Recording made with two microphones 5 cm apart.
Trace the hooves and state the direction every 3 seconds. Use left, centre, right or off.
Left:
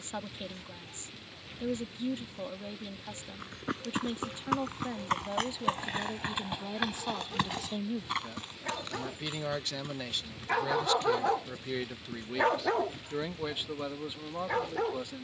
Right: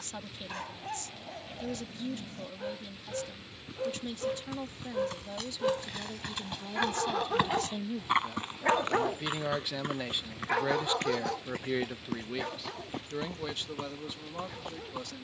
off, left, centre, right, right.